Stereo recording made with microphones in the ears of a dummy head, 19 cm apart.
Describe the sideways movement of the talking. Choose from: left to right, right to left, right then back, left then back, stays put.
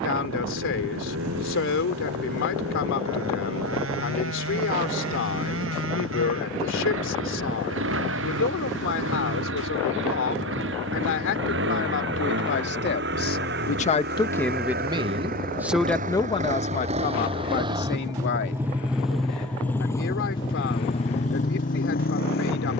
right then back.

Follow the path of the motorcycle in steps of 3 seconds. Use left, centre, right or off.
right, right, right, right, right, right, centre, left.